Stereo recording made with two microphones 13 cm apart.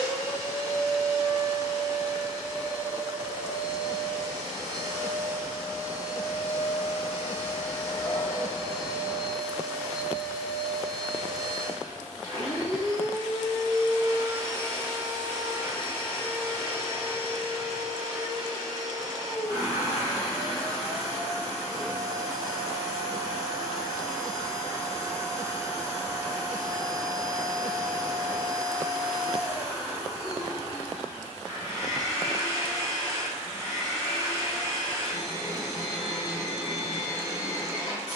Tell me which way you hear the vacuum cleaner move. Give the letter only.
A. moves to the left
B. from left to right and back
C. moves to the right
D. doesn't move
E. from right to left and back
D.